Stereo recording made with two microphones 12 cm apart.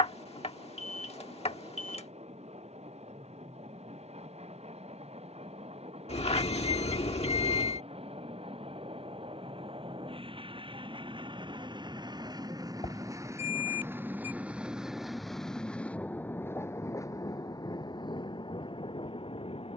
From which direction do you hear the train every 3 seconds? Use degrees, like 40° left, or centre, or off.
70° right, 70° right, 60° right, 50° right, 20° right, 20° left, 50° left.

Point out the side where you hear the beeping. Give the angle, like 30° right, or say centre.
60° left.